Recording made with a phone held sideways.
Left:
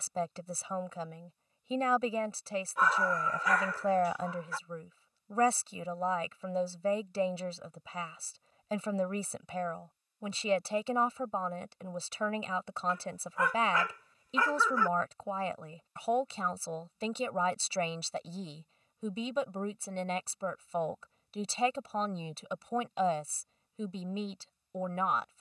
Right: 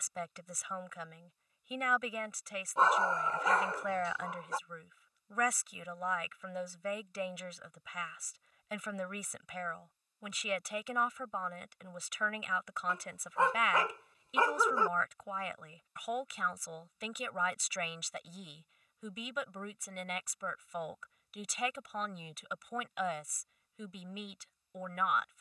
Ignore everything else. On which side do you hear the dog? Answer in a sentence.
In this clip you hear the dog on the right.